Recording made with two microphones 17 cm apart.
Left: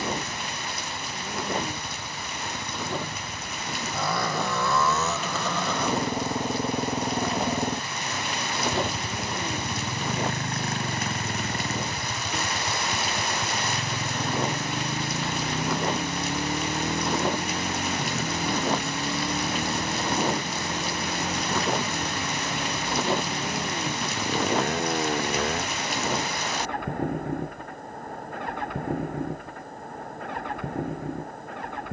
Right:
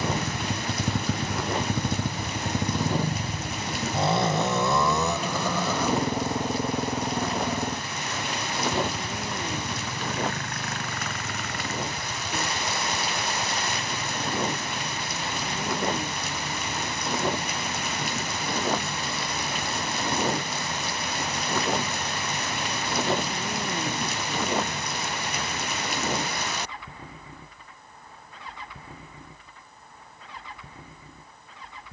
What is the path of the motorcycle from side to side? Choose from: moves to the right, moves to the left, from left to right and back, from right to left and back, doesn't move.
moves to the left.